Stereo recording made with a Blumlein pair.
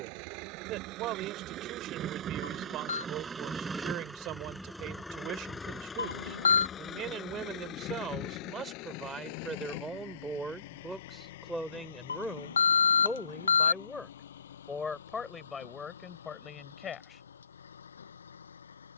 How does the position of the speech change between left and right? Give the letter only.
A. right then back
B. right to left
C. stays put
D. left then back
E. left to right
B.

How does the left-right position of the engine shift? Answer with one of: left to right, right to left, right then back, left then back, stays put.
right to left.